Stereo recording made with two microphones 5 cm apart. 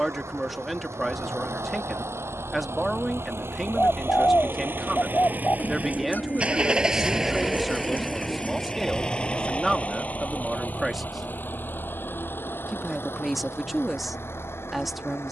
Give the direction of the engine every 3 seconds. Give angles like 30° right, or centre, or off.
70° right, 50° right, 10° right, 30° left, 50° left.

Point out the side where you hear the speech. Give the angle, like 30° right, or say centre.
centre.